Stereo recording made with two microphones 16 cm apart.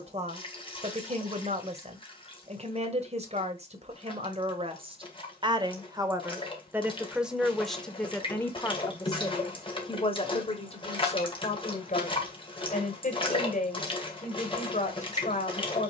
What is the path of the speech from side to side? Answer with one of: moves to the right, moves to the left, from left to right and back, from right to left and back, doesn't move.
moves to the left.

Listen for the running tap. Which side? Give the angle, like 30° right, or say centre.
30° left.